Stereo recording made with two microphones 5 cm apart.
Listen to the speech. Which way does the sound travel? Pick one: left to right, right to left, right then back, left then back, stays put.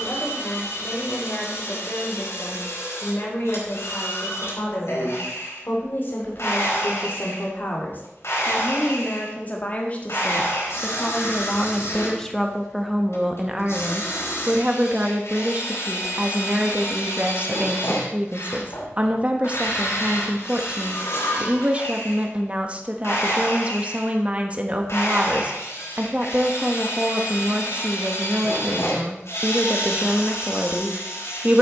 left to right.